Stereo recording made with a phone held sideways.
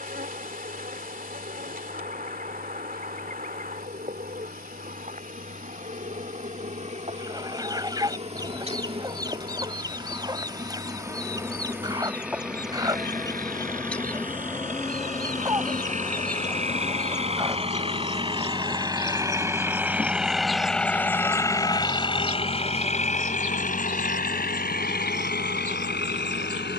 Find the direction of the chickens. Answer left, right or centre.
right.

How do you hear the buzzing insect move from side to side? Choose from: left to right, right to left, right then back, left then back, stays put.
left then back.